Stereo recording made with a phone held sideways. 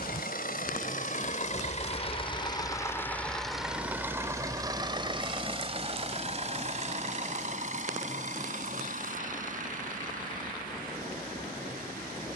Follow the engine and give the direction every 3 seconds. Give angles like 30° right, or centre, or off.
50° left, 20° right, 50° right, 60° right.